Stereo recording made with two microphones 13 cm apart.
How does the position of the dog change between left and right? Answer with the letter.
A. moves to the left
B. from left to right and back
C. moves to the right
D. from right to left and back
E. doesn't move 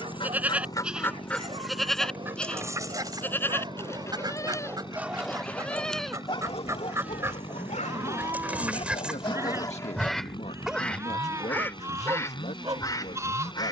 D.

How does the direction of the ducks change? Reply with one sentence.
You can hear the ducks move from left to right and back again.